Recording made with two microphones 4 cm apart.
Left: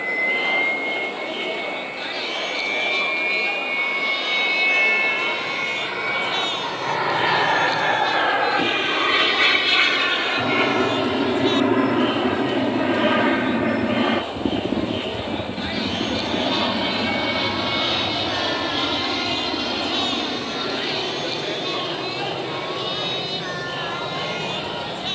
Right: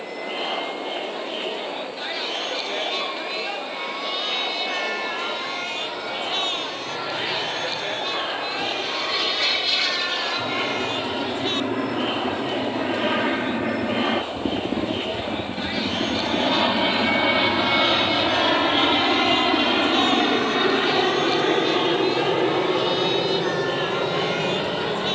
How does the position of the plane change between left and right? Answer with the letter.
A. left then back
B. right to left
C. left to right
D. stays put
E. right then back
C.